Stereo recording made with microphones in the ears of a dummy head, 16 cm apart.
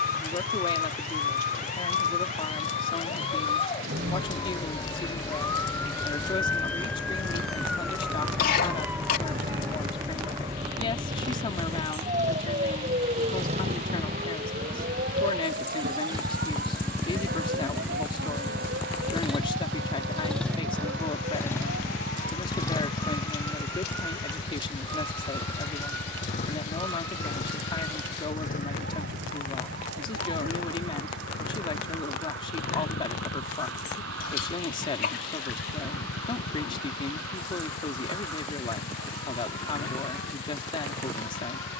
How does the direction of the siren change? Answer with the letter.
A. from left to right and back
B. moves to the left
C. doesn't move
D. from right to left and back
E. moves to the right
E.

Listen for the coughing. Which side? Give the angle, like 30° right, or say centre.
50° left.